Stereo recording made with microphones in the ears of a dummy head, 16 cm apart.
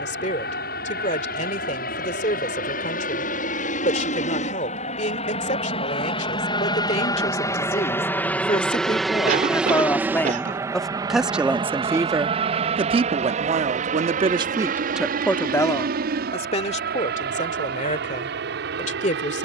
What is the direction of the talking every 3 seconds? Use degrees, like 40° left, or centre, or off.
40° left, 40° left, 30° left, 10° left, 30° right, 30° left, 40° left.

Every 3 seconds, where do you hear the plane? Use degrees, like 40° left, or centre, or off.
60° left, 40° left, 20° left, 10° right, 40° right, 50° right, 60° right.